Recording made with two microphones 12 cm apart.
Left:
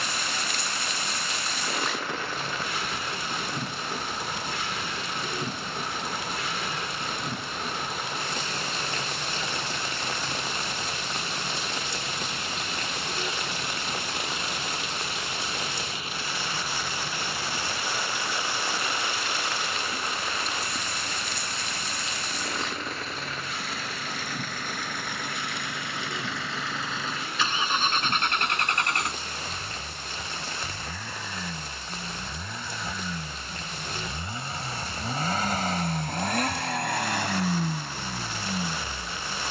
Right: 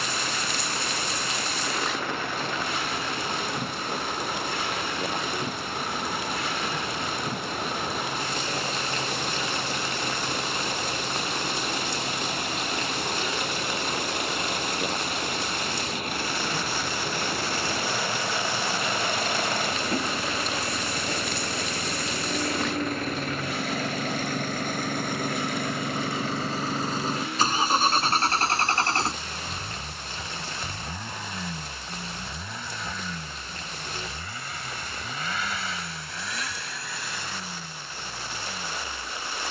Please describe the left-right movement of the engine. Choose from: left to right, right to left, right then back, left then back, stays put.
right to left.